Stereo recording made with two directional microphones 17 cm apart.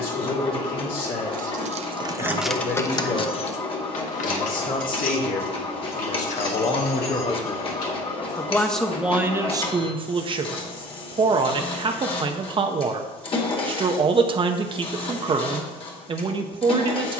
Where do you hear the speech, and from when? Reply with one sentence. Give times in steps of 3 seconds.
You can hear the speech on the left from 0 s and on the right from 9 s.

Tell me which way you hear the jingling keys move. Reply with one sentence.
In this clip you hear the jingling keys travel towards the left.